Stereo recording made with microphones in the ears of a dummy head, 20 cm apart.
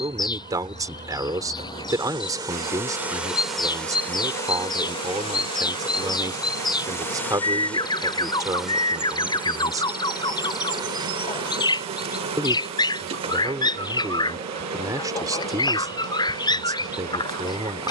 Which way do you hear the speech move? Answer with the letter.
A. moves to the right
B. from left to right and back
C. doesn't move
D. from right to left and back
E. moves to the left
C.